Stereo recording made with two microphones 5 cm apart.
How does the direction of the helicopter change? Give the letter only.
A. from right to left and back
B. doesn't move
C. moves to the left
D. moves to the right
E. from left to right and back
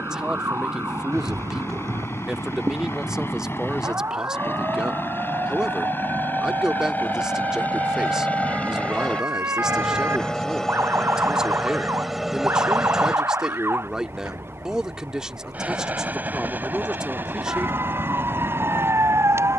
D.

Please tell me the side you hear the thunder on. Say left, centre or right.
right.